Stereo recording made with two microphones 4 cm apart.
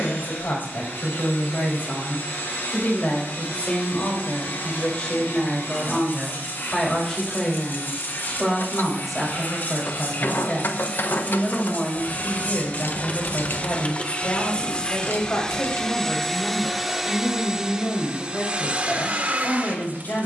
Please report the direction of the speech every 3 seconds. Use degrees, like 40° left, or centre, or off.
50° left, 30° left, 10° left, 10° left, 40° left, 50° left, 50° left.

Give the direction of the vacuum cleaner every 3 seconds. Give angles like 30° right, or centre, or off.
70° left, 70° left, 60° left, 50° left, 40° left, centre, 40° right.